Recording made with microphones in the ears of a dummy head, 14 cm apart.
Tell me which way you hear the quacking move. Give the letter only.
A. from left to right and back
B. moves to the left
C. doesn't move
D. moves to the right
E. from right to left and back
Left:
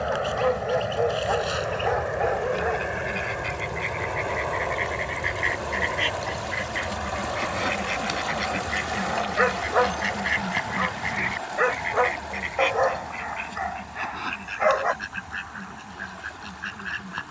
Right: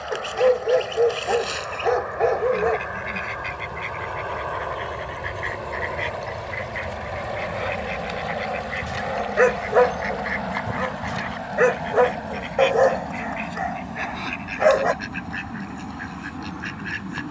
E.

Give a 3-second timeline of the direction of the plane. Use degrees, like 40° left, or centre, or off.
40° left, 10° left, 20° right, 40° right, 50° right, 50° right.